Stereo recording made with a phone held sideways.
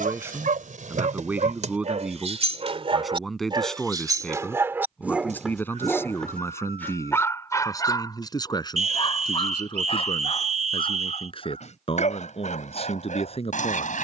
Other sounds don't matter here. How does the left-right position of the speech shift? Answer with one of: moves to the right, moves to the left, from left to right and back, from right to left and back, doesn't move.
moves to the left.